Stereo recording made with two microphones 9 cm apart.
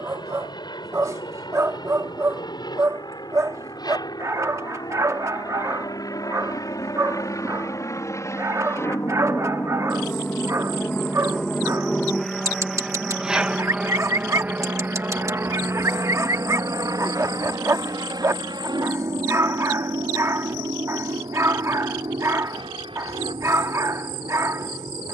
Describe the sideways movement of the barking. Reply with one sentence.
In this clip you hear the barking stay put.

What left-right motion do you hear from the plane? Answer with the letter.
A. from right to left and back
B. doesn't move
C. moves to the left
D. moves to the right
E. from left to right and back
D.